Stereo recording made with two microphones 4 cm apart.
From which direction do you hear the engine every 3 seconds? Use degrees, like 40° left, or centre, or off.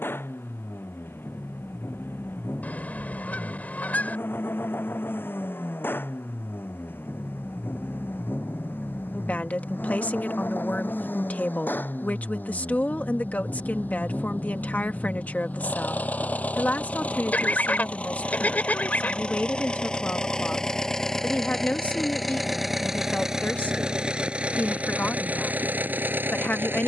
50° left, 50° left, 50° left, 50° left, 40° left, 30° left, 20° left, centre, 40° right.